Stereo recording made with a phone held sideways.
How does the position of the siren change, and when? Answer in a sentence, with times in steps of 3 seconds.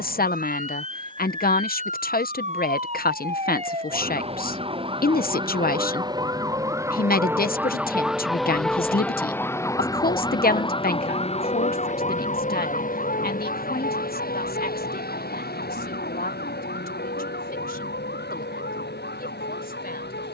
In this clip you hear the siren on the right from 0 s, in the centre from 6 s and on the left from 9 s.